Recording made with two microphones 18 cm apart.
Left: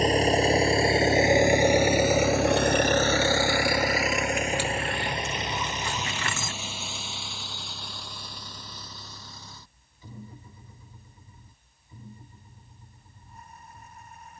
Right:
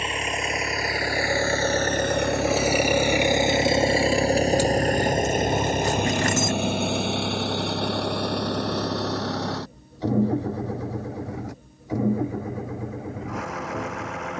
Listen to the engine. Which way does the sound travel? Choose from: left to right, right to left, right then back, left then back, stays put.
left to right.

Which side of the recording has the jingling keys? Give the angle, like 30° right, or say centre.
40° right.